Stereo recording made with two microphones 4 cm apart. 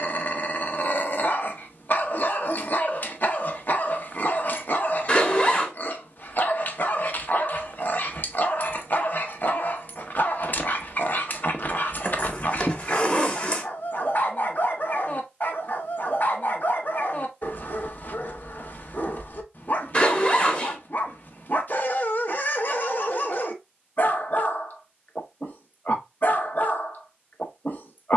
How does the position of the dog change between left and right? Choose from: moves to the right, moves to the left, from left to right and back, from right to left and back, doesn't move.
doesn't move.